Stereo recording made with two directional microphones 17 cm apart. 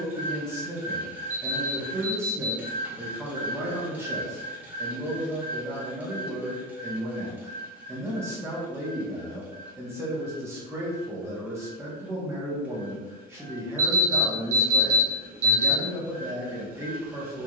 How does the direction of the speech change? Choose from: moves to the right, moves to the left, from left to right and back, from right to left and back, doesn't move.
doesn't move.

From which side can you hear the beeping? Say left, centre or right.
right.